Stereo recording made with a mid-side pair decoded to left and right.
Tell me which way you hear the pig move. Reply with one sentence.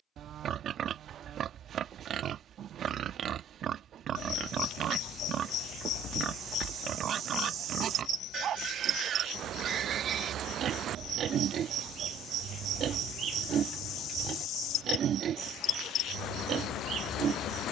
In this clip you hear the pig stay in one place.